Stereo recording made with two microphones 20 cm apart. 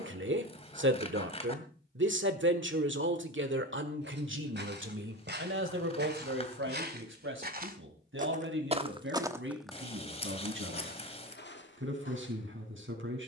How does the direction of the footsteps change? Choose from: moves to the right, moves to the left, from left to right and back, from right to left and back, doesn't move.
moves to the left.